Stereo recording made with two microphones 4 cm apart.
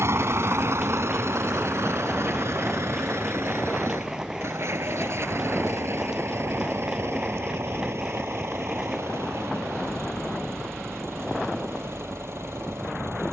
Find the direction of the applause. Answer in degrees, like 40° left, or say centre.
10° right.